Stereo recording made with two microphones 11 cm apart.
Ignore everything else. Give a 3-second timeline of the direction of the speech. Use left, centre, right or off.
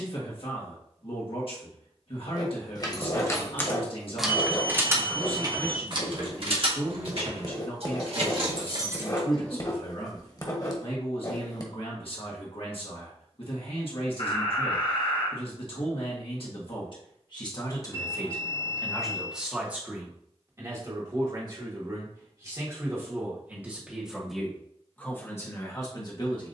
left, left, left, left, left, left, centre, right, left.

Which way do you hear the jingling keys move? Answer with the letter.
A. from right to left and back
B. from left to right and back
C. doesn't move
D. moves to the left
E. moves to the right
B.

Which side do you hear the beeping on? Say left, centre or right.
left.